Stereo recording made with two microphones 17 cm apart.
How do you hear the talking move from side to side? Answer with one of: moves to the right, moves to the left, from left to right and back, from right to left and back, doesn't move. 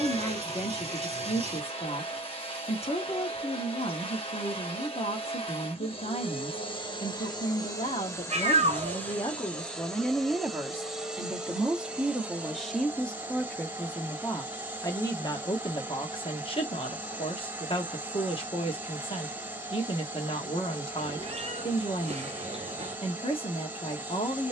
from left to right and back.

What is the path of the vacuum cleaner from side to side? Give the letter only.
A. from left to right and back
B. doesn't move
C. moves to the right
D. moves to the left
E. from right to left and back
C.